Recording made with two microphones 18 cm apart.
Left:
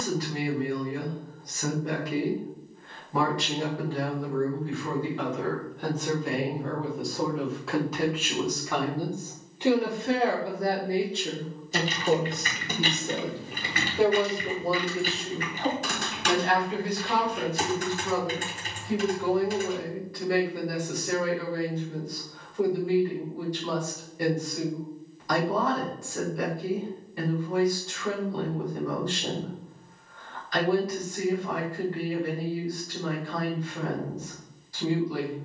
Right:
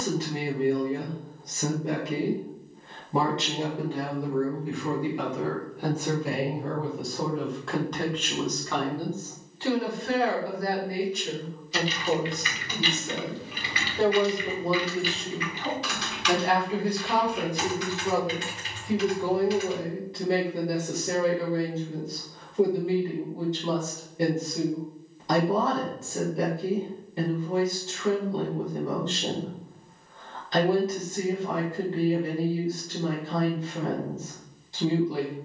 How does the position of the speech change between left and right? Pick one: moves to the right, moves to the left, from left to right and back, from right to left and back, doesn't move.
from right to left and back.